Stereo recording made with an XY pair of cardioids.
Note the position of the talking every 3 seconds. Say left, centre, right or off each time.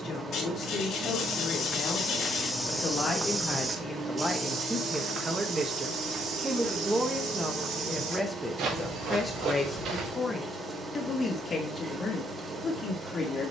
left, centre, centre, left, left.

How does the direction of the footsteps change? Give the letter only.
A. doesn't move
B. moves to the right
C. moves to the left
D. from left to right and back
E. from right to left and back
B.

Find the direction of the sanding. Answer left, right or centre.
left.